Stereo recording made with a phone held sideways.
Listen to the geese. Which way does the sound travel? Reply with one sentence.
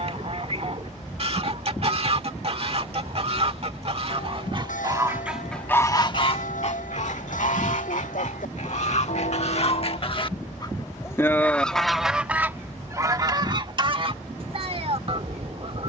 In this clip you hear the geese move from right to left and back again.